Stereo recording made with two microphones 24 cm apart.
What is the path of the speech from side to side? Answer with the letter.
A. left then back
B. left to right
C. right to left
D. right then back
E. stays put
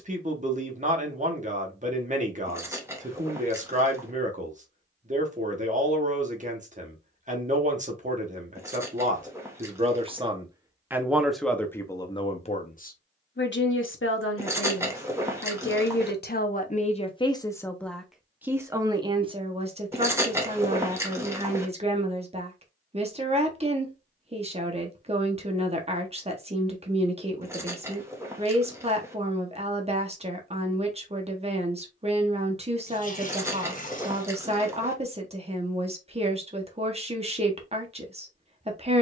A.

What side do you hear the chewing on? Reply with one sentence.
You can hear the chewing in the centre.